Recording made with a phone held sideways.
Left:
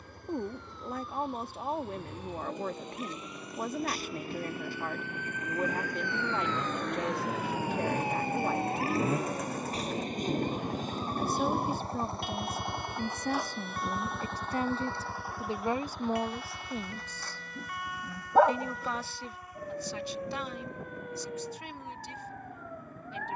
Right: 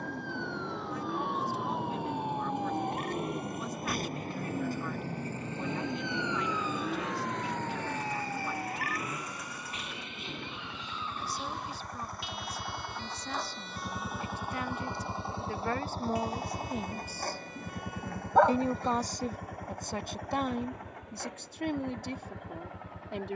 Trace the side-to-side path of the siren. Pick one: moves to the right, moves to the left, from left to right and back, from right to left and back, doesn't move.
moves to the left.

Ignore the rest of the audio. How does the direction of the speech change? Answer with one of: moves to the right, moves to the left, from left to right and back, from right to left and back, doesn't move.
moves to the right.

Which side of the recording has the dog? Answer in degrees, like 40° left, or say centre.
10° left.